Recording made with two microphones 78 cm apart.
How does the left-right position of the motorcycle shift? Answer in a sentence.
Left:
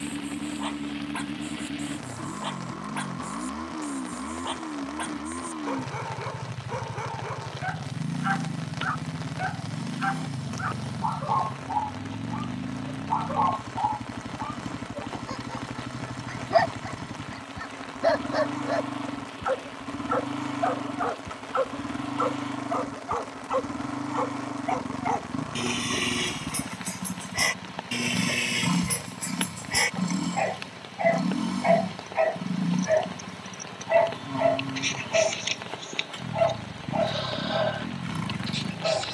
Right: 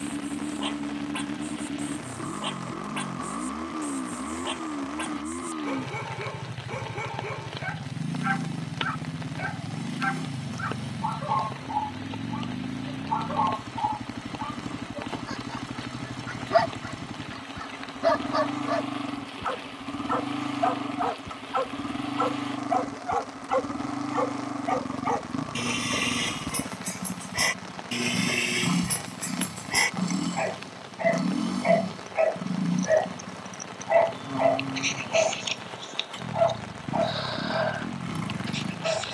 In this clip you hear the motorcycle stay in one place.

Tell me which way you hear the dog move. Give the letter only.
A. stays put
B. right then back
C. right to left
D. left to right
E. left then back
C.